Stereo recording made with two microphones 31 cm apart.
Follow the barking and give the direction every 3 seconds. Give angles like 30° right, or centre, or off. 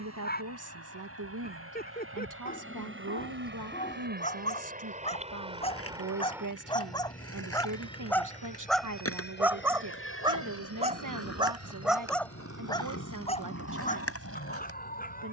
30° left, 20° left, 10° left, 10° right, 20° left.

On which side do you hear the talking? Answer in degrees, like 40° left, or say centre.
80° right.